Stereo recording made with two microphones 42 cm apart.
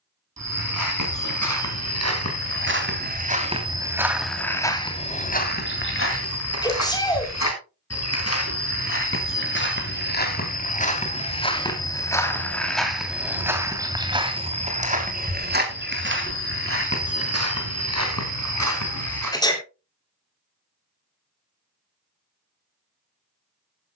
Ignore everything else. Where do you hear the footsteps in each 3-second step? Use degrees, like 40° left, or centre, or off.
40° right, centre, 40° left, 20° left, 10° right, 30° right, 40° right, off.